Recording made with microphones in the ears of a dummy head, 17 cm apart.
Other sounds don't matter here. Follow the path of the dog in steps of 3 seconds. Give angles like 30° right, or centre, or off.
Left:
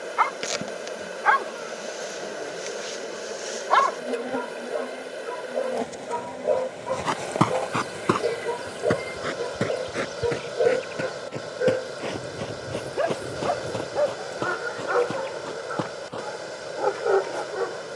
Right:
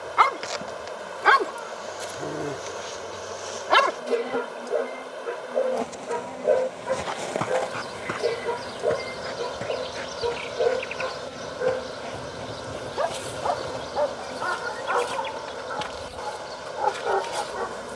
50° right, 30° right, 10° right, 20° left, 30° left, 40° left.